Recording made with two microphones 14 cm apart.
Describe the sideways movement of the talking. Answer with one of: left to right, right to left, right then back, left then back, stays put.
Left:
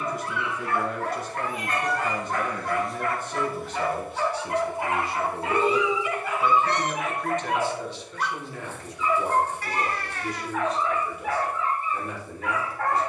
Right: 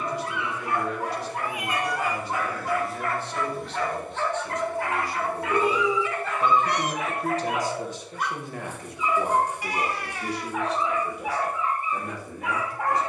left to right.